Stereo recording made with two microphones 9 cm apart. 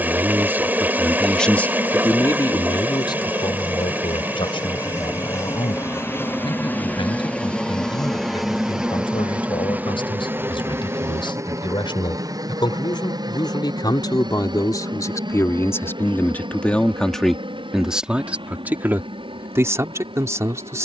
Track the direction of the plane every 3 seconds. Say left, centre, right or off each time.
left, left, centre, right, right, right, right.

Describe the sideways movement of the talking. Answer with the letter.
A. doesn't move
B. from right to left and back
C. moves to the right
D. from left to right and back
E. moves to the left
B.